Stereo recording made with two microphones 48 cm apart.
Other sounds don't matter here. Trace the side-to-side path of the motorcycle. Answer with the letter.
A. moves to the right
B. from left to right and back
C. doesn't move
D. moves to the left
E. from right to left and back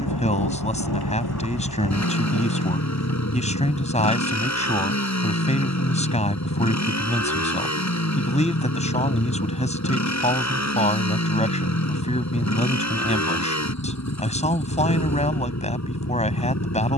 C.